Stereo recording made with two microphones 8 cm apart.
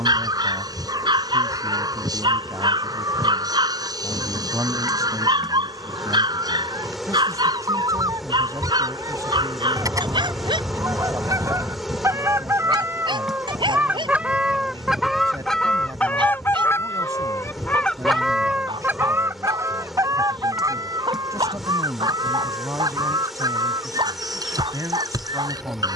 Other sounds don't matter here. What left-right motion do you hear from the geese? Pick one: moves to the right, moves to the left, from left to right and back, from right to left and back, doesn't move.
from right to left and back.